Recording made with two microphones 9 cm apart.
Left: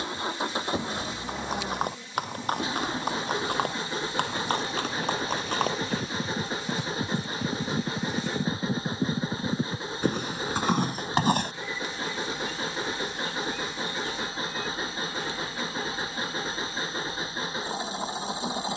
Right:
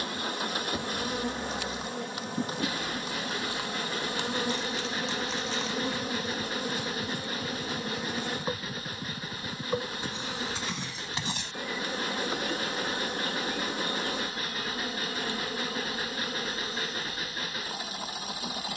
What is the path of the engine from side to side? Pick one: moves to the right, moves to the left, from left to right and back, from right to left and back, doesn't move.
doesn't move.